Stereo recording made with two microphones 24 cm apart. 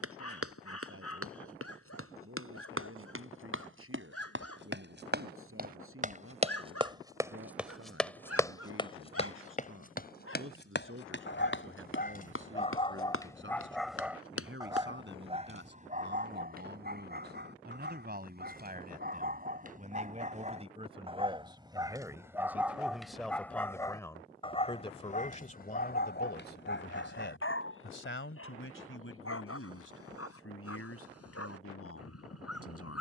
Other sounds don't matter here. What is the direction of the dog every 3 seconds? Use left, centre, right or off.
left, left, left, left, centre, right, right, centre, left, left, left.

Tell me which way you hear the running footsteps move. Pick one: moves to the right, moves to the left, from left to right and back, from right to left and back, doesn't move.
moves to the left.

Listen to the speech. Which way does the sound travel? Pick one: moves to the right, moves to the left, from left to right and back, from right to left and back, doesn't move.
moves to the left.